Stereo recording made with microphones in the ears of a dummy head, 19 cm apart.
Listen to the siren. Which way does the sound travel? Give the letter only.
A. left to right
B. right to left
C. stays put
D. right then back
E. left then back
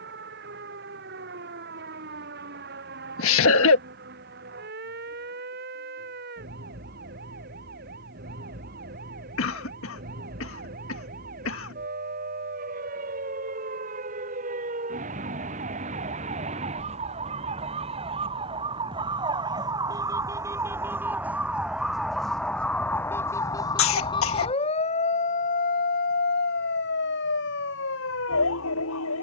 B.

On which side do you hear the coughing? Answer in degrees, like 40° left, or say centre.
70° left.